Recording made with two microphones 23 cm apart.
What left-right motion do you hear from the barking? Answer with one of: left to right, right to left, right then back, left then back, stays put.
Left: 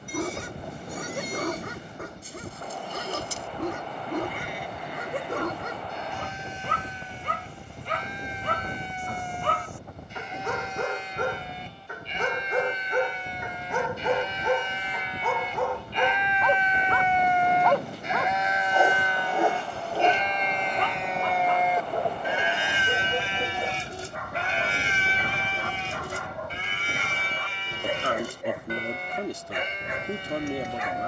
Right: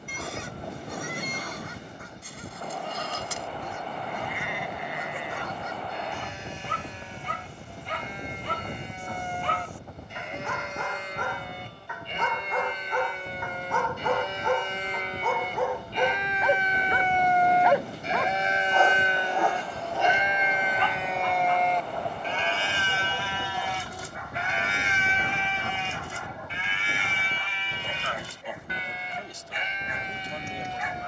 right then back.